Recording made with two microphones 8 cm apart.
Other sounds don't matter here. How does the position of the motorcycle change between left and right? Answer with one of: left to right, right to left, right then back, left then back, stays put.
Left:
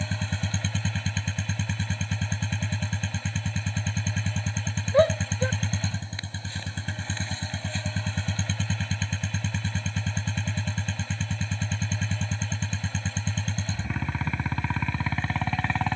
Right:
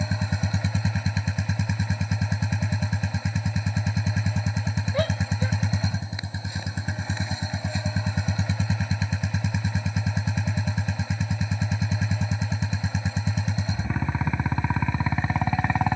stays put.